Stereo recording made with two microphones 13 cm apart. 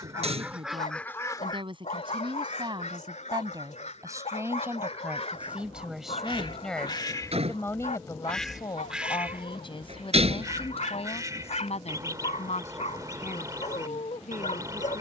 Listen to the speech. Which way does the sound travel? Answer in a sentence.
You can hear the speech move to the left.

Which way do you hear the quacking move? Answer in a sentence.
You can hear the quacking move from right to left and back again.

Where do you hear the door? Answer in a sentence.
In this clip you hear the door on the right.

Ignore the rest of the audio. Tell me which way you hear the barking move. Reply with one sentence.
In this clip you hear the barking stay in one place.